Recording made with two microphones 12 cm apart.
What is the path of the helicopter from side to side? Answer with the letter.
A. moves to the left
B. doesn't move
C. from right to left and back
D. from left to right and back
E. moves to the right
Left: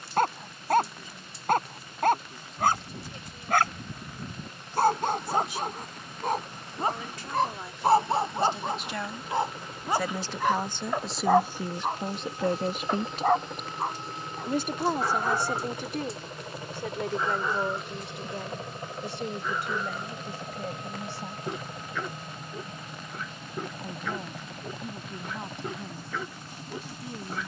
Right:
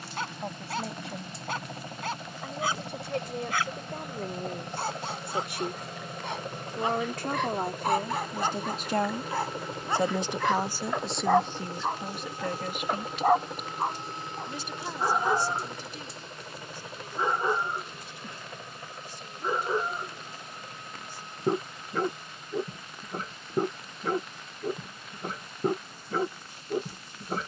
A.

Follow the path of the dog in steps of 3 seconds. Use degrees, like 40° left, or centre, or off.
50° left, 50° left, 40° left, 20° left, 10° right, 20° right, 30° right, 40° right, 40° right.